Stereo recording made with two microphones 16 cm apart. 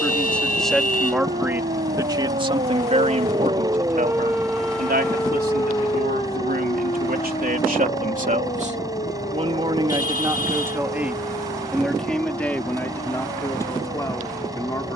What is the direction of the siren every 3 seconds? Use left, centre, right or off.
right, centre, left, left, left.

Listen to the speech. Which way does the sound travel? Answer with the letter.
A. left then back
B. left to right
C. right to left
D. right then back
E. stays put
D.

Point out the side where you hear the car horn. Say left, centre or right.
left.